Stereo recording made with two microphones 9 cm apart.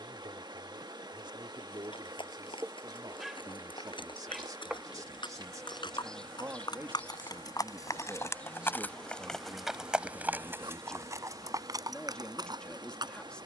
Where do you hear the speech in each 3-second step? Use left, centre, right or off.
right, right, right, centre, centre.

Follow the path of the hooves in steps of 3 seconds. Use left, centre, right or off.
left, left, left, right, right.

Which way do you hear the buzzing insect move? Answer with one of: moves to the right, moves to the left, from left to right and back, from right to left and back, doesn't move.
from right to left and back.